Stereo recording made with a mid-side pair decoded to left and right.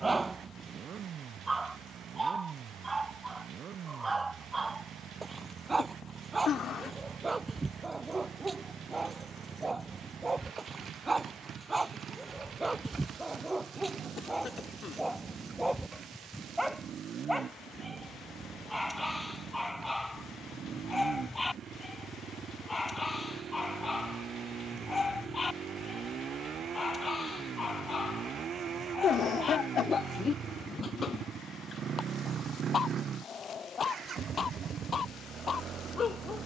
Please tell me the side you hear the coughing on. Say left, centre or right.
left.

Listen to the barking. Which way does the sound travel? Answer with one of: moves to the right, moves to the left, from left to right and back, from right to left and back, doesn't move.
moves to the left.